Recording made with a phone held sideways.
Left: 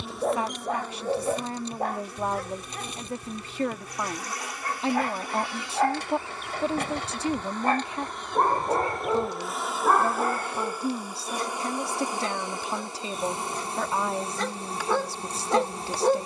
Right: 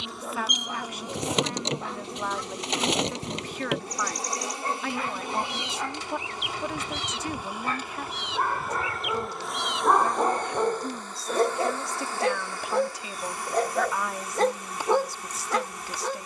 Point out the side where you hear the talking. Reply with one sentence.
In this clip you hear the talking on the left.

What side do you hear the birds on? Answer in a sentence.
You can hear the birds on the right.